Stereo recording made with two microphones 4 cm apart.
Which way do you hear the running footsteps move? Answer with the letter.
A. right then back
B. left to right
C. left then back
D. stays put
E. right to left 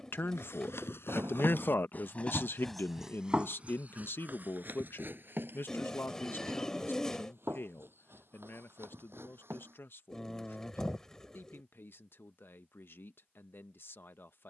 B.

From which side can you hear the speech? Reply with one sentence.
In this clip you hear the speech on the left.